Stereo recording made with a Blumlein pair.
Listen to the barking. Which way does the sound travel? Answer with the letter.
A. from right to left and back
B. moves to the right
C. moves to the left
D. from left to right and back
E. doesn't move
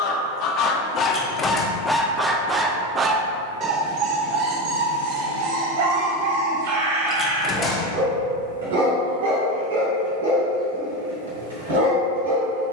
B.